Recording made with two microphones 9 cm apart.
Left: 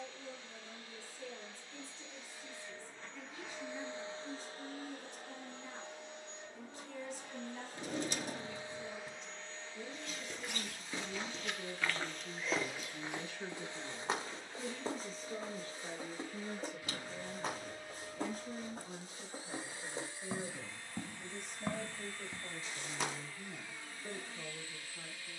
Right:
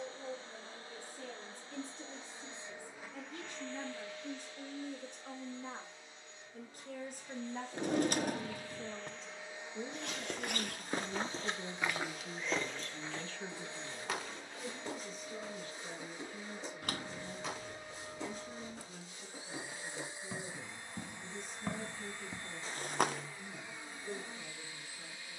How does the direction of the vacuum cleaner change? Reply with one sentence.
In this clip you hear the vacuum cleaner go left and come back.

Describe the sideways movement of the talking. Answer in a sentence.
You can hear the talking travel towards the left.